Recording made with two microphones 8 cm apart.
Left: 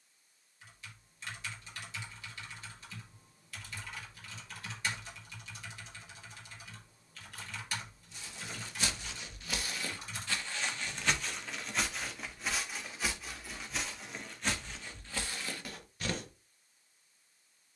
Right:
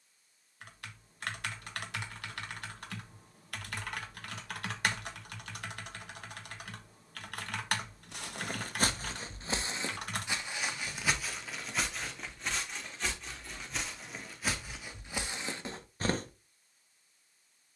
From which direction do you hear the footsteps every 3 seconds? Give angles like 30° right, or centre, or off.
off, off, 50° right, 20° right, centre, 20° right.